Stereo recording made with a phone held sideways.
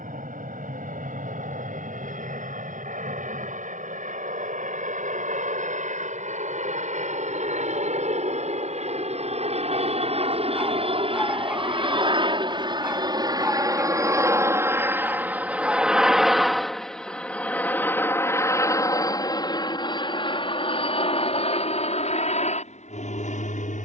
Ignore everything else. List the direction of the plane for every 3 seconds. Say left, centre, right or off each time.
right, right, right, right, right, centre, left, left.